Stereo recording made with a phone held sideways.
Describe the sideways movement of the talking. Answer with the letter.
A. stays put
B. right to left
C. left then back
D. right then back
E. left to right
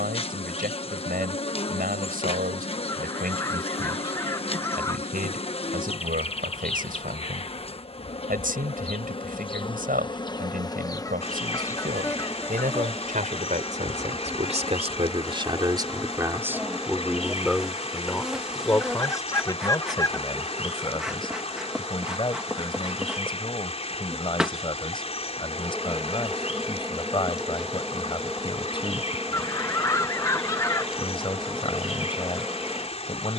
B.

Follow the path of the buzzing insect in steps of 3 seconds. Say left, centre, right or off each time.
left, left, left, left, centre, centre, centre, centre, centre, centre, centre.